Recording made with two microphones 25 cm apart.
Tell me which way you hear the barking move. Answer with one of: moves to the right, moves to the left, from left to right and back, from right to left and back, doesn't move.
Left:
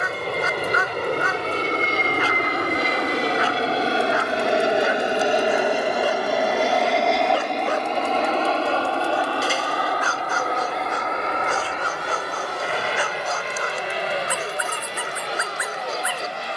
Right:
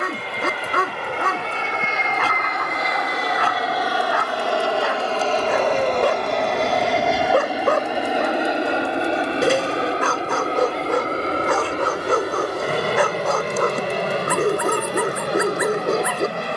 doesn't move.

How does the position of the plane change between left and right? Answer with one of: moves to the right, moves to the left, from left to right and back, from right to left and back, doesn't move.
moves to the right.